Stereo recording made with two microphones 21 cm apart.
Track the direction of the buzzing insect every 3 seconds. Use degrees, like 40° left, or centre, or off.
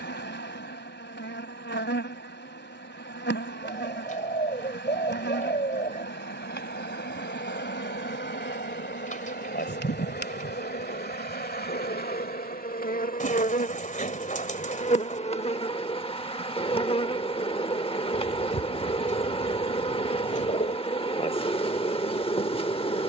60° left, 60° left, 50° left, 50° left, 40° left, 30° left, 30° left, 30° left.